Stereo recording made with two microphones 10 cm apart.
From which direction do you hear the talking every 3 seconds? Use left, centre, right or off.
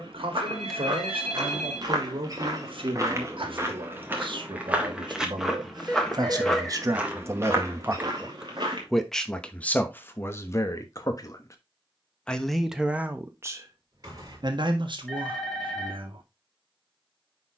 right, right, right, left, right, right.